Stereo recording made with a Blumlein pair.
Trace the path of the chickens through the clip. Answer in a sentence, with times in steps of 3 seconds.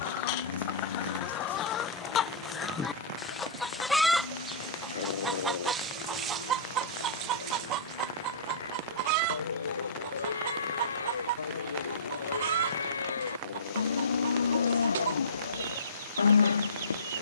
You can hear the chickens on the left from 0 s, in the centre from 3 s and on the right from 6 s.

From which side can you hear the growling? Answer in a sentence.
You can hear the growling on the left.